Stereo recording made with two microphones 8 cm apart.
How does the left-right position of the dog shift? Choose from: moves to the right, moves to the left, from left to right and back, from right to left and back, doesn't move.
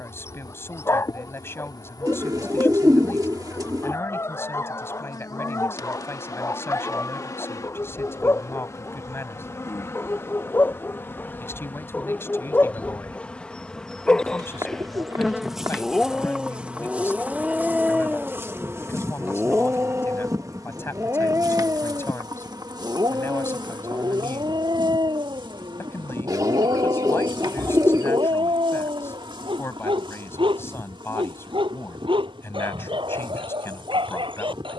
moves to the right.